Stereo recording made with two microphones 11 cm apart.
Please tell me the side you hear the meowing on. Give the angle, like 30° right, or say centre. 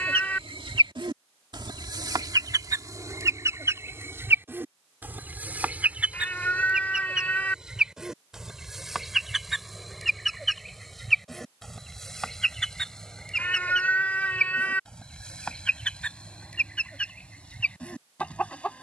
10° left.